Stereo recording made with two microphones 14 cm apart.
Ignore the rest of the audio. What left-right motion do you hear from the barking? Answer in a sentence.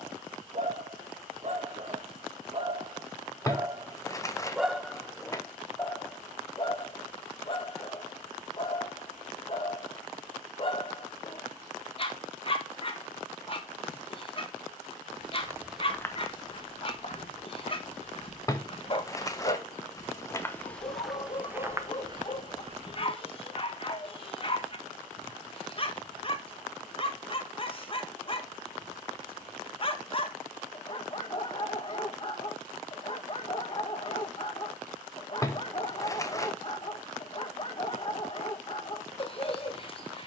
In this clip you hear the barking go from the right side to the left.